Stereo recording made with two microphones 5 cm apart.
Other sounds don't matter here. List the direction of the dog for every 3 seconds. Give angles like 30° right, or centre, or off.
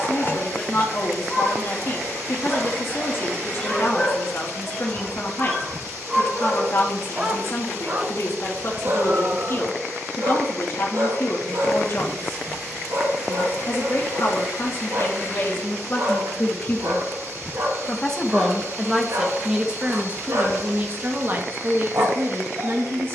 20° left, 10° left, 30° right, 60° right, 80° right, 80° right, 80° right, 80° right.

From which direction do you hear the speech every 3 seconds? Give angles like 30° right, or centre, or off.
50° left, 50° left, 50° left, 50° left, 50° left, 30° left, 10° right, 50° right.